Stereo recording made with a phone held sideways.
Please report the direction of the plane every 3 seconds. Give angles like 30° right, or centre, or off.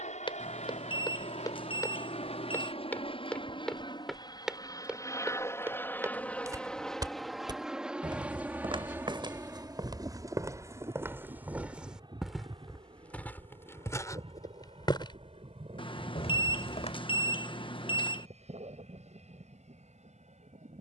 50° left, 30° left, centre, 20° right, 40° right, 40° right, 50° right.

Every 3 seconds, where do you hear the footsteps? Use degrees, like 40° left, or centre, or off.
30° left, centre, 30° right, 20° right, 20° left, 40° left, off.